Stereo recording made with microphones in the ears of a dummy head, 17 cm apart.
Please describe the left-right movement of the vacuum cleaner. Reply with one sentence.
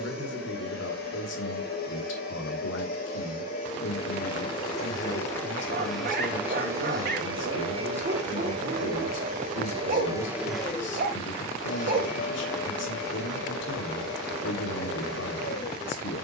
In this clip you hear the vacuum cleaner move from left to right and back again.